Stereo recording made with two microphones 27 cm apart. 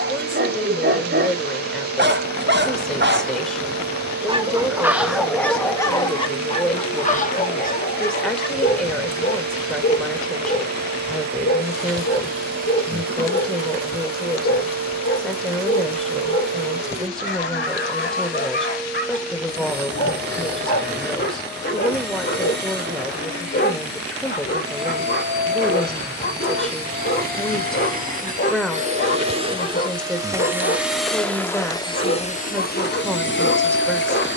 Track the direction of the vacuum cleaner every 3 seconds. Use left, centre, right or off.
right, right, right, right, right, right, right, right, right, right, centre, left.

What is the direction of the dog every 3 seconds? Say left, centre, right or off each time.
right, centre, left, left, left, left, left, left, left, left, left, left.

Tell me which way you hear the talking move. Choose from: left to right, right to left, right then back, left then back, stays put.
stays put.